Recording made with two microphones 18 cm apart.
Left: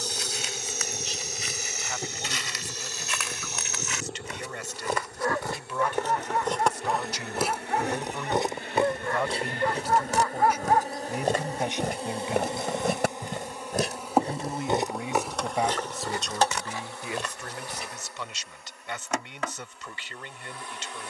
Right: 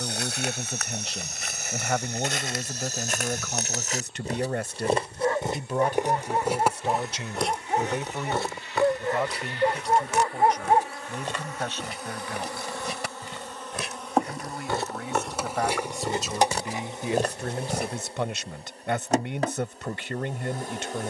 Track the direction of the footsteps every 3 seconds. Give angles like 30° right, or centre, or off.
60° right, 30° right, 10° left, 40° left, 40° left, 30° right, off.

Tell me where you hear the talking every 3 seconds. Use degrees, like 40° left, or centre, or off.
60° right, 50° right, 20° right, 10° left, 20° left, 10° right, 50° right.